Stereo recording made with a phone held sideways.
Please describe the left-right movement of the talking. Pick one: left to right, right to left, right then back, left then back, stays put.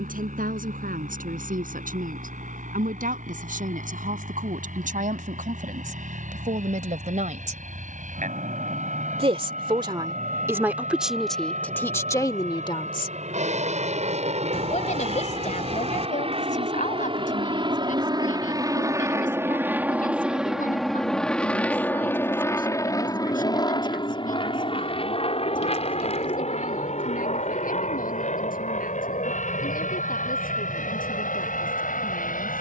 right to left.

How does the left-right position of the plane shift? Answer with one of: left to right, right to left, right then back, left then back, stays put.
right to left.